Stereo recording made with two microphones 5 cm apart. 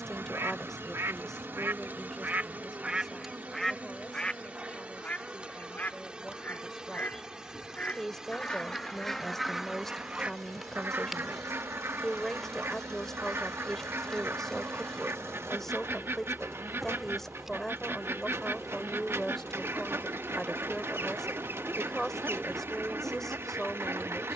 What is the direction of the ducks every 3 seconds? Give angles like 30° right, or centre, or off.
50° right, 20° left, 30° left, 30° right, 60° right, 60° right, 60° right, 60° right.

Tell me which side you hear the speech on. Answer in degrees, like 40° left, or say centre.
10° left.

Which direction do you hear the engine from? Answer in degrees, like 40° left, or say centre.
70° right.